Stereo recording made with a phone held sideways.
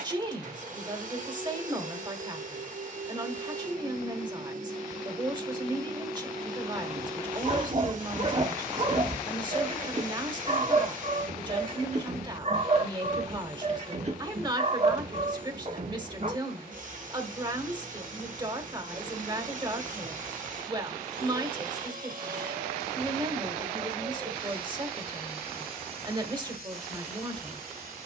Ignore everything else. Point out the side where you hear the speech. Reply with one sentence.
You can hear the speech on the right.